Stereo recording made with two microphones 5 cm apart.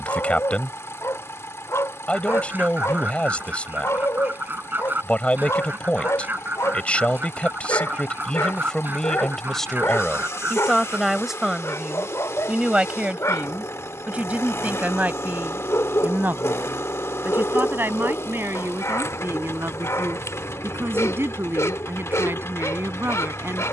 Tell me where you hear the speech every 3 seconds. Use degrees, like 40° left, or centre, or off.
20° left, 20° left, 20° left, centre, 20° right, 40° right, 50° right, 50° right.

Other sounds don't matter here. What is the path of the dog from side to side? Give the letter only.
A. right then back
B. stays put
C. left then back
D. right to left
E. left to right
B.